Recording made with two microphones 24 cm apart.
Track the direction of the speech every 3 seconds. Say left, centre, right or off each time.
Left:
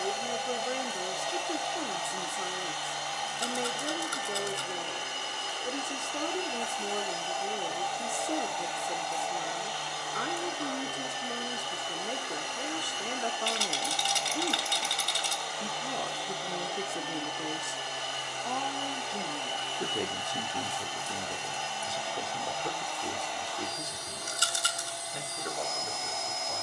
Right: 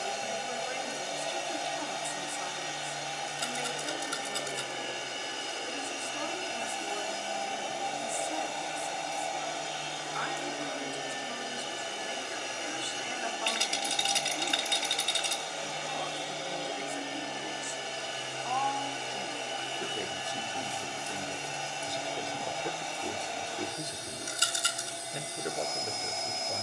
left, left, left, left, left, left, left, centre, right.